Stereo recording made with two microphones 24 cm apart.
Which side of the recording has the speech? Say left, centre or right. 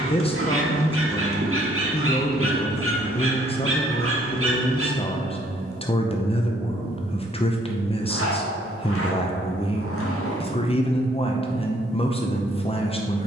left.